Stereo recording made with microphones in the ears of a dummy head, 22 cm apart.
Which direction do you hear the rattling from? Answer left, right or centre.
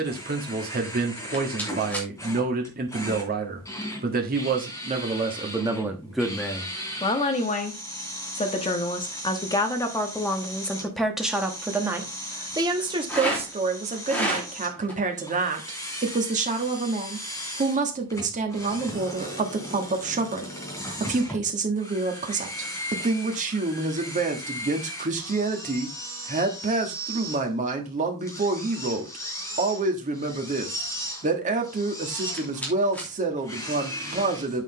centre.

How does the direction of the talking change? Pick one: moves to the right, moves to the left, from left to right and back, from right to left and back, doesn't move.
from right to left and back.